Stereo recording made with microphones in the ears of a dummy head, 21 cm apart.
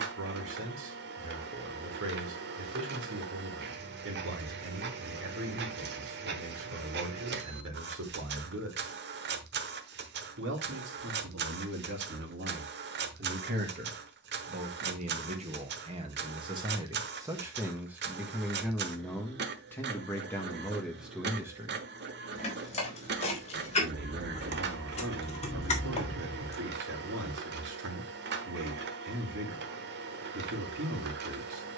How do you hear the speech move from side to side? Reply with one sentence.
In this clip you hear the speech go left and come back.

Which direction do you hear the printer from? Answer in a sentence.
You can hear the printer on the right.